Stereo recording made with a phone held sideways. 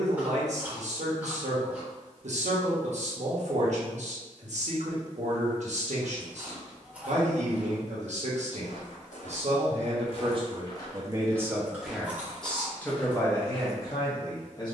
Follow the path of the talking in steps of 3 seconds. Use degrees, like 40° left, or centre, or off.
60° right, 60° right, 60° right, 30° right, 20° left.